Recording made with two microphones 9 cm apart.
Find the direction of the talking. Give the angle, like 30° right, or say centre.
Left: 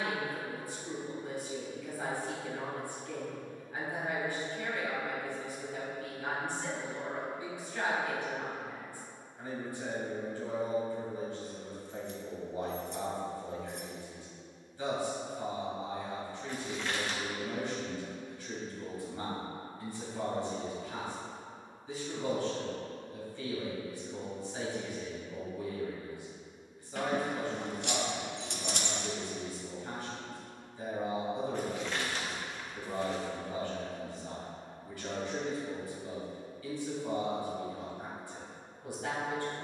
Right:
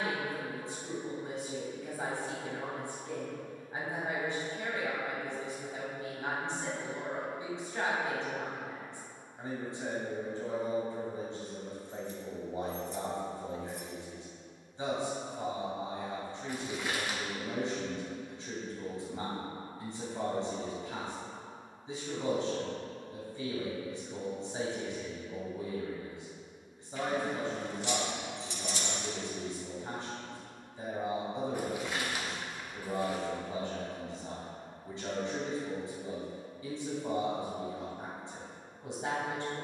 20° right.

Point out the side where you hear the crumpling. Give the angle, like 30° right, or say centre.
10° right.